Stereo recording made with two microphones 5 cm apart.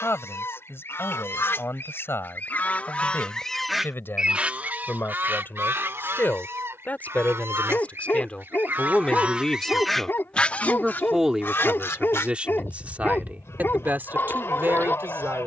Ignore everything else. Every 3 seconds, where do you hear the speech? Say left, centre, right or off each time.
left, left, left, centre, right.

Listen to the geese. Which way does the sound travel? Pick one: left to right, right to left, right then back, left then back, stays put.
right then back.